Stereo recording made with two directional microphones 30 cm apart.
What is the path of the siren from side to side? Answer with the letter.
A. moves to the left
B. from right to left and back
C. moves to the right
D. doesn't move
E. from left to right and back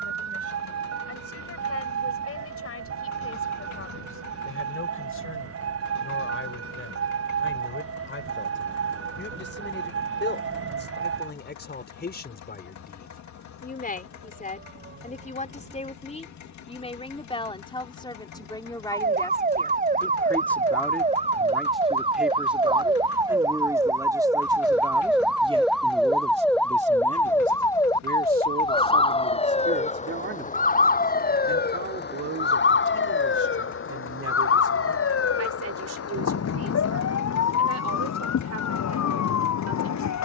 A.